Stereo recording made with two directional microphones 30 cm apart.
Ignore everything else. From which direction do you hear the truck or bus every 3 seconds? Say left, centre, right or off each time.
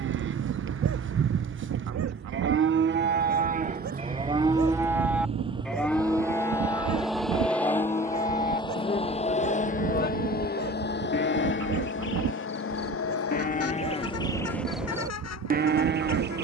right, right, centre, left, left, left.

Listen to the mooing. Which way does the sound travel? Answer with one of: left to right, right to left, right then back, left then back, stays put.
left then back.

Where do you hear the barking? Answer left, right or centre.
right.